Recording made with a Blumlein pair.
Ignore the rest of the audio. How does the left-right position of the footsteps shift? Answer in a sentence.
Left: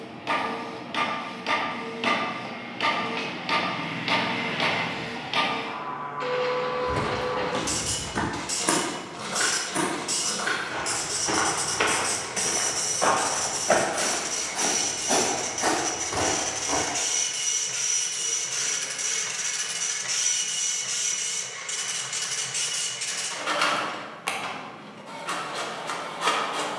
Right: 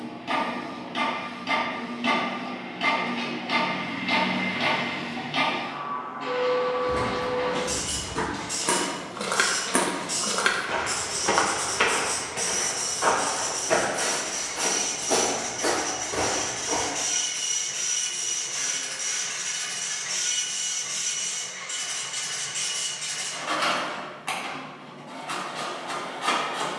In this clip you hear the footsteps move from left to right and back again.